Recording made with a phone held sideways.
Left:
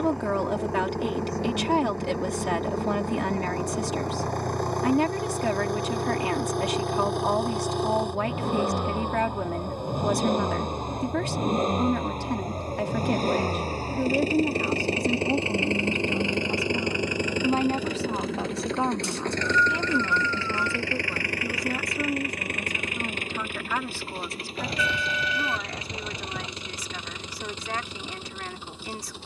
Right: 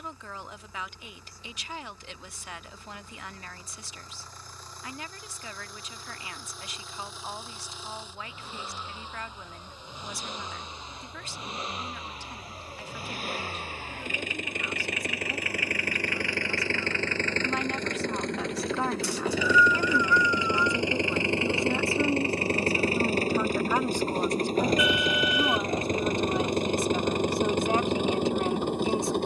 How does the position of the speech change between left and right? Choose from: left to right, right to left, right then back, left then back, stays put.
left to right.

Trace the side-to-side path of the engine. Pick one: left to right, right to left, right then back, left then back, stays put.
left to right.